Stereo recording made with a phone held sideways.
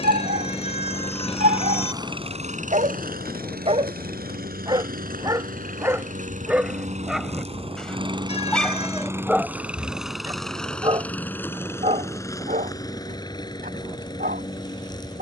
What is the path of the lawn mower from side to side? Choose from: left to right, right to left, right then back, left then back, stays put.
right then back.